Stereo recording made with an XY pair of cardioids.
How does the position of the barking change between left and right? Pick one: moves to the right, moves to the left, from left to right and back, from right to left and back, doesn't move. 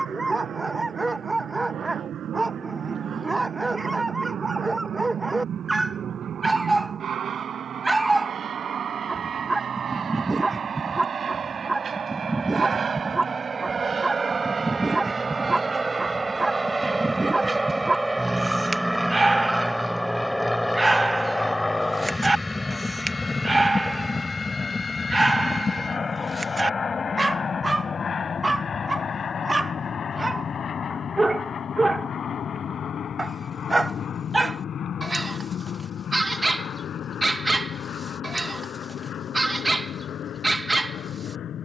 doesn't move.